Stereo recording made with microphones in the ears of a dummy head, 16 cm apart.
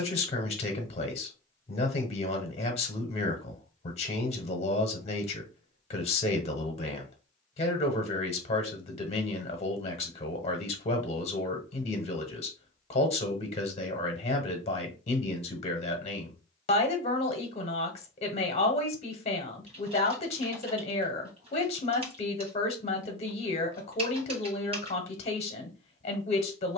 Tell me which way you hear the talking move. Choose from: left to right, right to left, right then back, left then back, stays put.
stays put.